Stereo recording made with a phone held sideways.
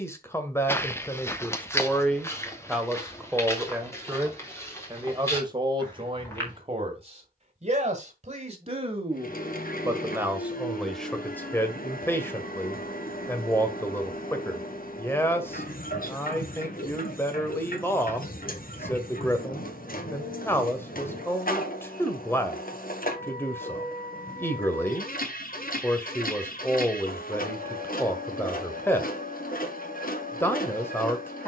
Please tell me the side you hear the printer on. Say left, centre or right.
left.